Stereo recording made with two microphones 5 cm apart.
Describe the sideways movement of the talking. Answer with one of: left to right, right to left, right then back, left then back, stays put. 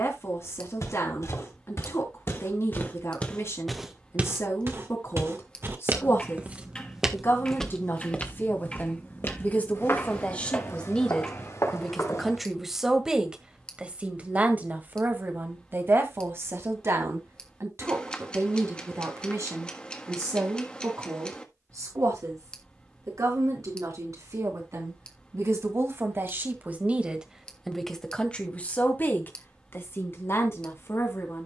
right then back.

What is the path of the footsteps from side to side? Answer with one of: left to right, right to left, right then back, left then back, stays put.
right then back.